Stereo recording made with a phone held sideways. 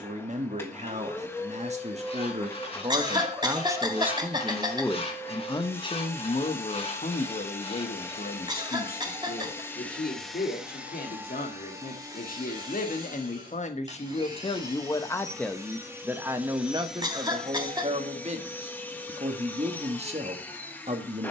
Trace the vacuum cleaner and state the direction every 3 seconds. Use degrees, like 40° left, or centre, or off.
10° left, 10° left, 10° left, centre, 30° right, 10° right, 10° left.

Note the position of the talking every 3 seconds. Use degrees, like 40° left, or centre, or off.
40° right, centre, 50° left, 70° left, 50° left, 20° right, 40° right.